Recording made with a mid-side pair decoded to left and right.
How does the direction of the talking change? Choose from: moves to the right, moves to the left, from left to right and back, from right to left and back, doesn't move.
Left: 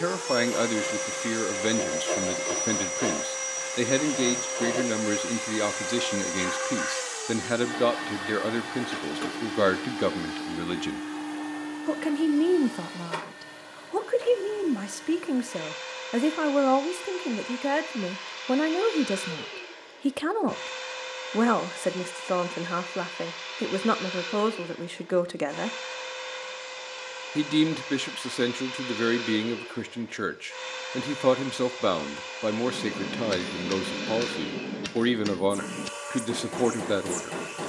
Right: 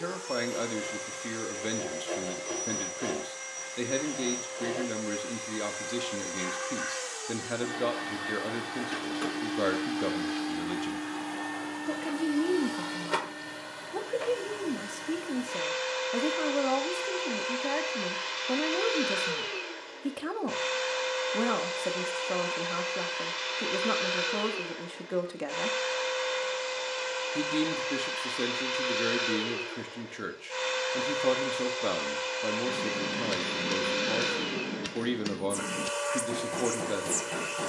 doesn't move.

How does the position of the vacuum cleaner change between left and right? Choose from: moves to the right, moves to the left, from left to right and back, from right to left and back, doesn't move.
moves to the right.